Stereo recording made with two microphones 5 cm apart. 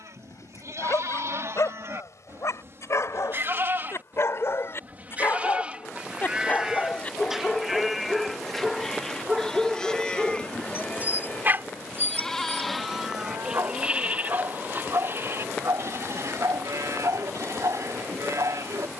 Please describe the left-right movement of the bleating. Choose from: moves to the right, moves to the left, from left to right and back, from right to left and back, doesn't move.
from right to left and back.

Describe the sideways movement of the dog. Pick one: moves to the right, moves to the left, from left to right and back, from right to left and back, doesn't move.
moves to the right.